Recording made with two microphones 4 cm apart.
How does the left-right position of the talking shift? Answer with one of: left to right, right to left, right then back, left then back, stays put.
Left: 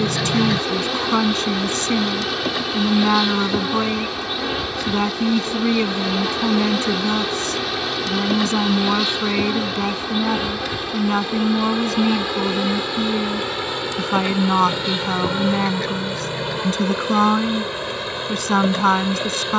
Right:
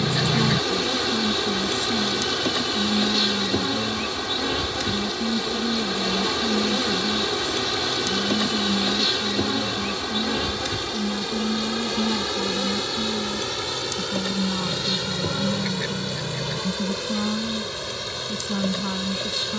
stays put.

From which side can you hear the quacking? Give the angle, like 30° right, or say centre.
centre.